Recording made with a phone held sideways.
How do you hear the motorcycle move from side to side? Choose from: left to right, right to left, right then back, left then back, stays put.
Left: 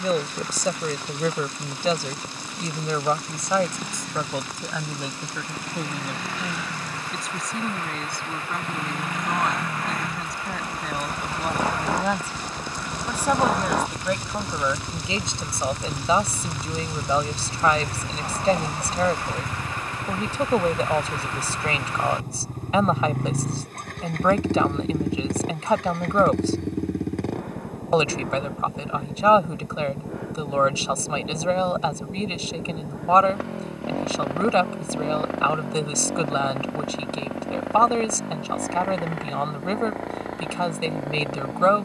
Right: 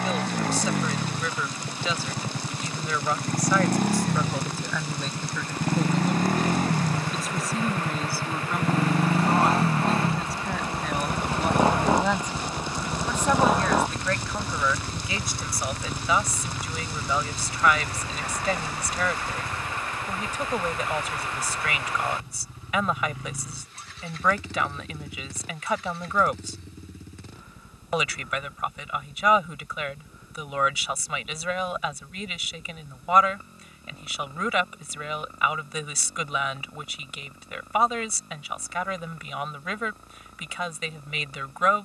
right to left.